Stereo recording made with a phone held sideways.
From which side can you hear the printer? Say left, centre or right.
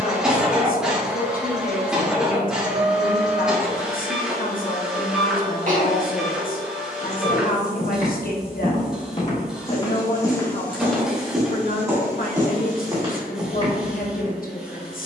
centre.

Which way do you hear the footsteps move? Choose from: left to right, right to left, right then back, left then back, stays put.
left to right.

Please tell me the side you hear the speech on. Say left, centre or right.
left.